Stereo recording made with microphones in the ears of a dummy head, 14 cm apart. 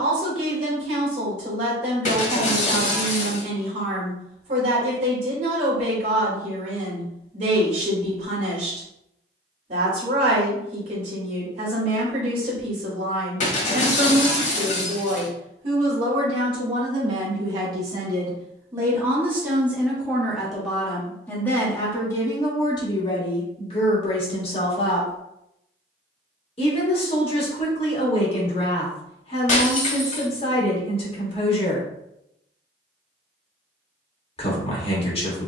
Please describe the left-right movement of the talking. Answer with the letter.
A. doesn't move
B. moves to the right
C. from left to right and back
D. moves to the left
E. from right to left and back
D.